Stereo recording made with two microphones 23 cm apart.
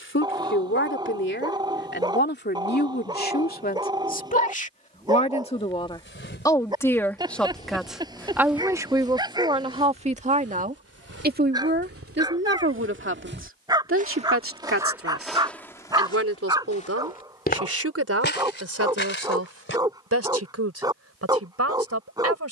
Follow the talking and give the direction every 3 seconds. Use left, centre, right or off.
left, left, centre, right, right, right, right, right.